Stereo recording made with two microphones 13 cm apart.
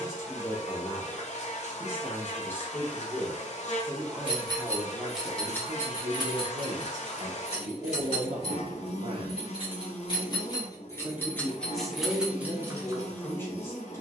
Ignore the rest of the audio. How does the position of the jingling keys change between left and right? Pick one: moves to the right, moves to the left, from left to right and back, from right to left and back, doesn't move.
from right to left and back.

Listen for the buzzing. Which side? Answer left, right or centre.
left.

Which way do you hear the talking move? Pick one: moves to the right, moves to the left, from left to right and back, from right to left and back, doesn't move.
from left to right and back.